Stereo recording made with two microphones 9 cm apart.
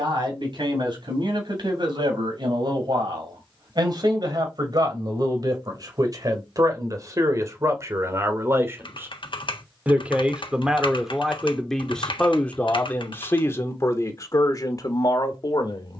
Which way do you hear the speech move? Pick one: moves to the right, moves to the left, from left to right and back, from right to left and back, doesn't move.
moves to the left.